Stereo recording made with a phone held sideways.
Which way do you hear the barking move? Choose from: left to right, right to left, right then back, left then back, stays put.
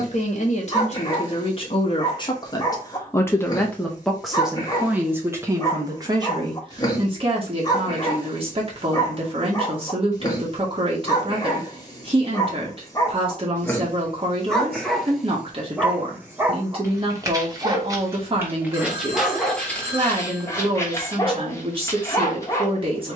right then back.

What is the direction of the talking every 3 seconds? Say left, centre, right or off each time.
left, centre, right, right, right, right, right, right.